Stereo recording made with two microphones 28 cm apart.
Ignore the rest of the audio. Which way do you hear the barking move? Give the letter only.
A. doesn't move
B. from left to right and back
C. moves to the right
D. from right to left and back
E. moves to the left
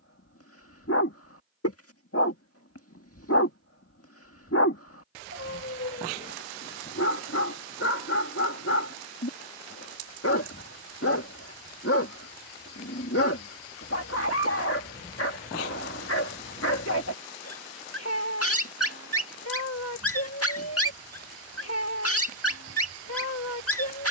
A.